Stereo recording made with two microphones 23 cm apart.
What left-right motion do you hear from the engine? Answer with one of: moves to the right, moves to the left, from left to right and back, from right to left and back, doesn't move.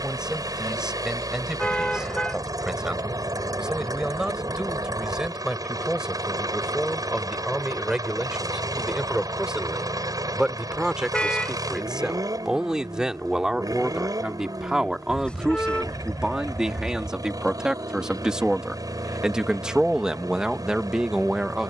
doesn't move.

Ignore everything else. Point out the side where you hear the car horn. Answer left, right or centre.
centre.